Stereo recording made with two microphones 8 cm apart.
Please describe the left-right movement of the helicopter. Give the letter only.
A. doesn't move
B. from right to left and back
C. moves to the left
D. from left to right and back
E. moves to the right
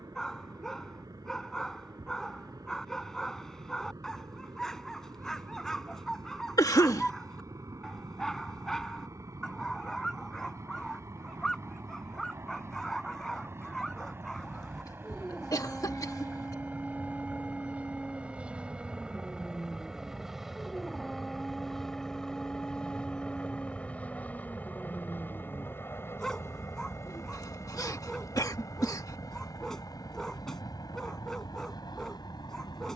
C.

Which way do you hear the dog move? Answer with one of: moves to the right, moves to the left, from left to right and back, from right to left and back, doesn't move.
doesn't move.